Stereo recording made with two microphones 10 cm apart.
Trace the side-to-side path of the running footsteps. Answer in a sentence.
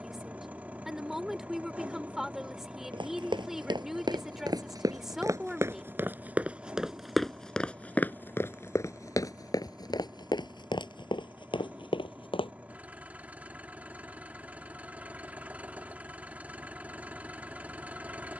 You can hear the running footsteps move to the left.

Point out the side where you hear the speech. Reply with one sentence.
You can hear the speech in the centre.